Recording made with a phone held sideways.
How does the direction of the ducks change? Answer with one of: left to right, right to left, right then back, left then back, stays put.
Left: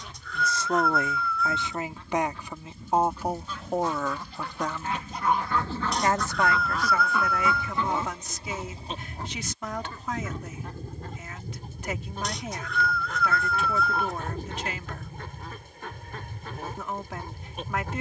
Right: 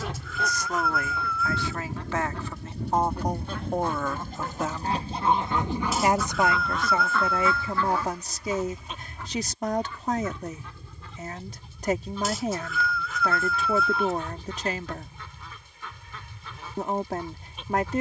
right to left.